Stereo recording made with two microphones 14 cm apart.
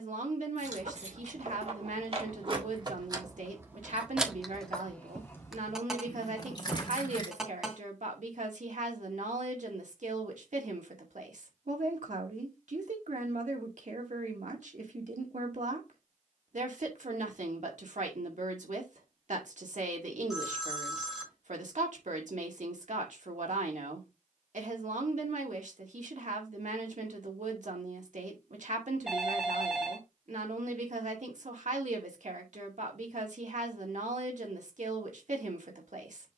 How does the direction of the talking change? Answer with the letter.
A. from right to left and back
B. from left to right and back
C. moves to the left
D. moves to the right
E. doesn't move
E.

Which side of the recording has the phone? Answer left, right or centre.
centre.